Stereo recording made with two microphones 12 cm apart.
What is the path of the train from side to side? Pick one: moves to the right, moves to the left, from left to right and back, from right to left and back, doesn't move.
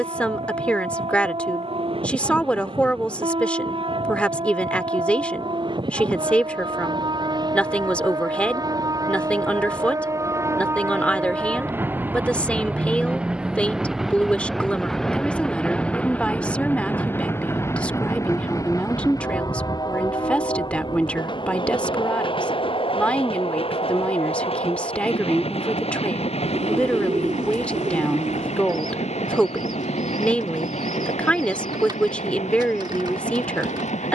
moves to the left.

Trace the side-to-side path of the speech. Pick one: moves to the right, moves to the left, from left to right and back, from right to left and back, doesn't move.
doesn't move.